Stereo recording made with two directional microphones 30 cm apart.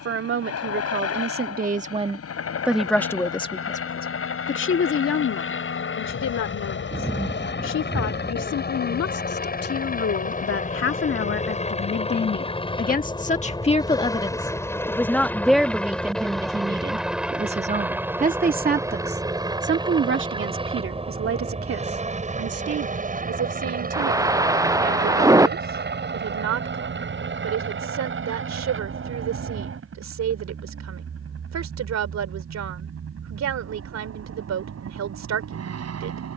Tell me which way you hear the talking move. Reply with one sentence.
You can hear the talking go left and come back.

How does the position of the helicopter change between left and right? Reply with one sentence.
In this clip you hear the helicopter go from the left side to the right.